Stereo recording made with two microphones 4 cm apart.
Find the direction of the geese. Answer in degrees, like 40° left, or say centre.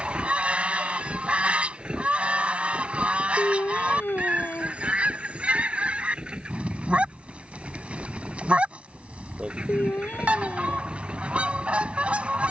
30° right.